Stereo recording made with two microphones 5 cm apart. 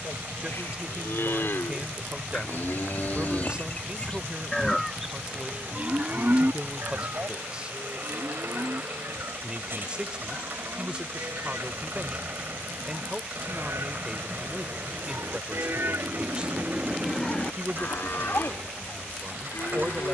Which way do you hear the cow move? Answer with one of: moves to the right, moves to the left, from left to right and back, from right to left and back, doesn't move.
from left to right and back.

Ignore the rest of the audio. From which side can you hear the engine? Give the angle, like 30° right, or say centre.
50° right.